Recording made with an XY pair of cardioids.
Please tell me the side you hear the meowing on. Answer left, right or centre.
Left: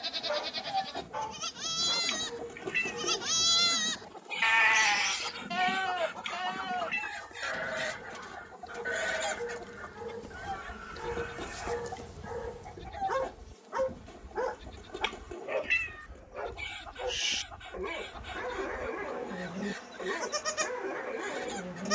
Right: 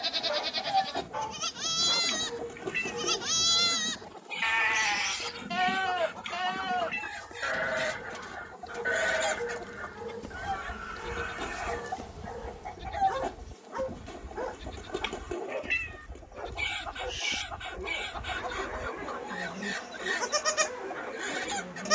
centre.